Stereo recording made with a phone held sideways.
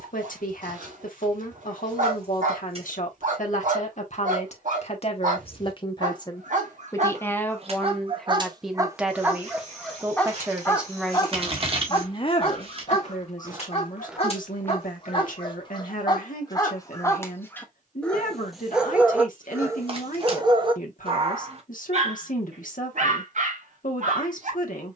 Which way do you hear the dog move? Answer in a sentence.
In this clip you hear the dog go left and come back.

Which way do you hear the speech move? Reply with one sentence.
You can hear the speech move from left to right and back again.